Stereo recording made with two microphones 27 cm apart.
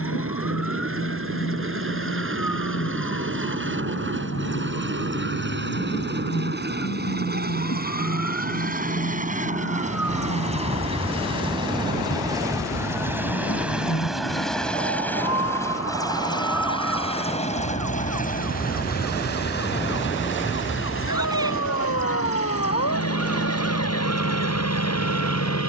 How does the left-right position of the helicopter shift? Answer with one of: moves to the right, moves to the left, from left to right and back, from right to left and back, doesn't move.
moves to the left.